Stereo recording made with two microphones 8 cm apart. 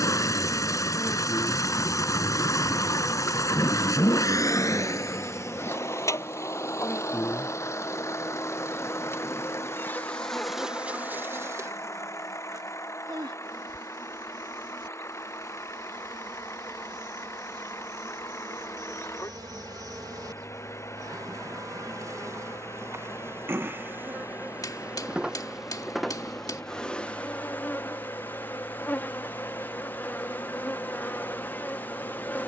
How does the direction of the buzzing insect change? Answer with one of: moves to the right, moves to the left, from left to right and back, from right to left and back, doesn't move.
from left to right and back.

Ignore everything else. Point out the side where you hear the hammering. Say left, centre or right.
left.